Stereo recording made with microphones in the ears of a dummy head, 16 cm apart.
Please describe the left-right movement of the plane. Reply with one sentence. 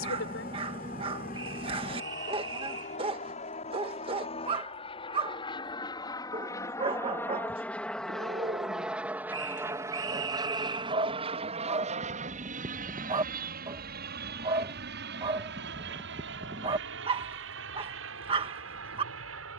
You can hear the plane move from left to right.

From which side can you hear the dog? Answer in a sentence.
In this clip you hear the dog on the right.